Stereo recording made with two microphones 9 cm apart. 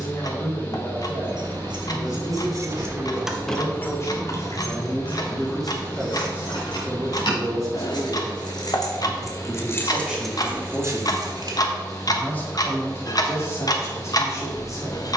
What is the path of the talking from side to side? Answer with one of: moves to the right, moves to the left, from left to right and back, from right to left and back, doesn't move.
from left to right and back.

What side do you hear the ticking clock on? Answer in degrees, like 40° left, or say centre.
50° left.